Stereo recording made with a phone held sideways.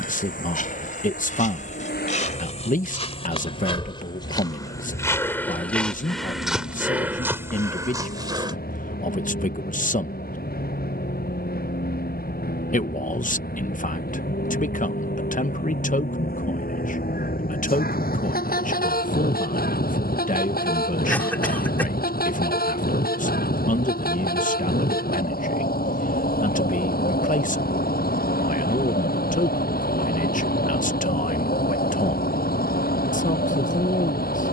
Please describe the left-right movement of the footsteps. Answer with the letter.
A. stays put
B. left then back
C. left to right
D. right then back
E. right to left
C.